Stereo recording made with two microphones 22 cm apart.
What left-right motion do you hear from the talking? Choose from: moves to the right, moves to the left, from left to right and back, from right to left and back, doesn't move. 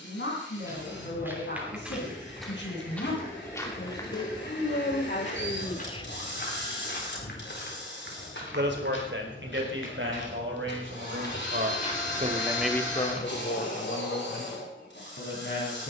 from left to right and back.